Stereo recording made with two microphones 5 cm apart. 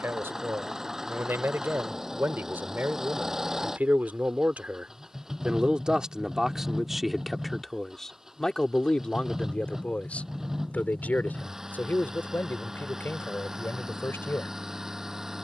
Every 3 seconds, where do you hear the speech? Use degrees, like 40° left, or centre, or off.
50° right, 30° right, centre, 30° left, 50° left.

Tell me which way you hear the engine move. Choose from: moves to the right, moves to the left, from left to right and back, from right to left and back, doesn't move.
doesn't move.